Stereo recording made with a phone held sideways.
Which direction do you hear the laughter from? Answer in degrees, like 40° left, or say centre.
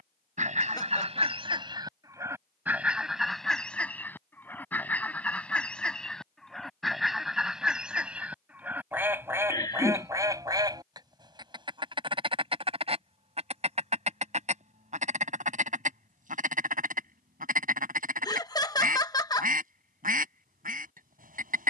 20° left.